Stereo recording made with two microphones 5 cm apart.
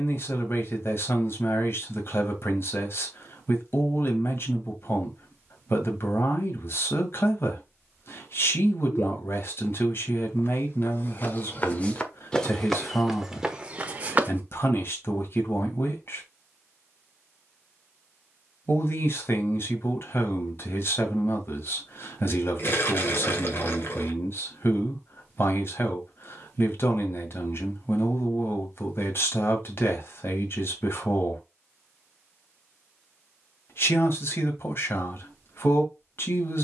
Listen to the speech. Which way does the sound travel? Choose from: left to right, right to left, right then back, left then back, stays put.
stays put.